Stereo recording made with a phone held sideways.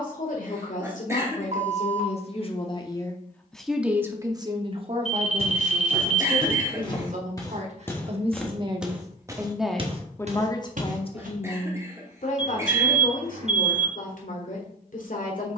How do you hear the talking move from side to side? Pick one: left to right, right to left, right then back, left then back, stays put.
right then back.